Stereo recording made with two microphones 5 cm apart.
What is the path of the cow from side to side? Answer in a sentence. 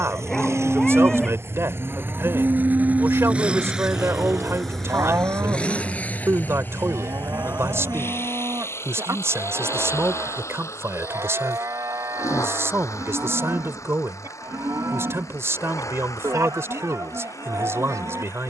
You can hear the cow go from the left side to the right.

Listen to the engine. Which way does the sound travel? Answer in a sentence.
You can hear the engine go from the right side to the left.